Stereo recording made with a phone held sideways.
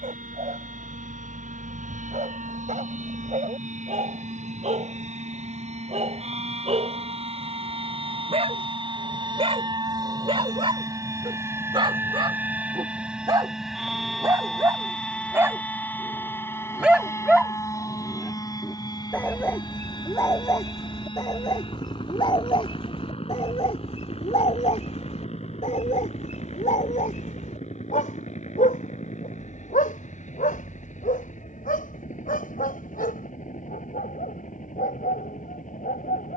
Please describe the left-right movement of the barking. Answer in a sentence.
In this clip you hear the barking go from the right side to the left.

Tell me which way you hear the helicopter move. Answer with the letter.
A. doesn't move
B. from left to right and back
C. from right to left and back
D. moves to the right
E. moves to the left
E.